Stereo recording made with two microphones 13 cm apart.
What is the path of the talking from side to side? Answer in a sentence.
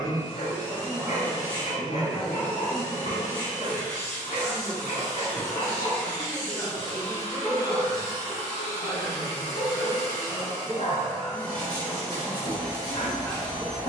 In this clip you hear the talking stay put.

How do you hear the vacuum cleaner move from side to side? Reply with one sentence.
You can hear the vacuum cleaner stay in one place.